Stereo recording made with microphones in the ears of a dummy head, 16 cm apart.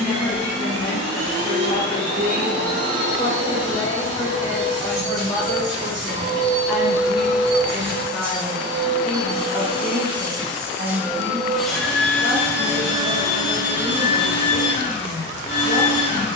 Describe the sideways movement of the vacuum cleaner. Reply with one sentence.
In this clip you hear the vacuum cleaner go from the right side to the left.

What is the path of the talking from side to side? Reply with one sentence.
In this clip you hear the talking travel towards the right.